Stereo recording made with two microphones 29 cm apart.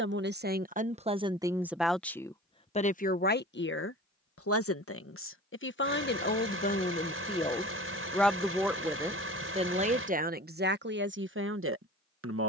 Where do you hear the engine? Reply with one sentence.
In this clip you hear the engine on the right.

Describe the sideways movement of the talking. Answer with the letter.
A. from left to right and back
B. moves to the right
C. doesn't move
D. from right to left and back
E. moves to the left
D.